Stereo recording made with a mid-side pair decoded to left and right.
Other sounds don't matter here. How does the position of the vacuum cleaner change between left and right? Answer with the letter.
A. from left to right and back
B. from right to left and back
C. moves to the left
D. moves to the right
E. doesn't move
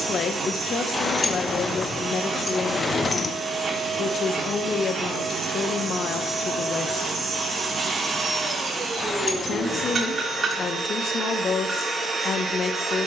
E.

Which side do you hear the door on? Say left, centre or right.
left.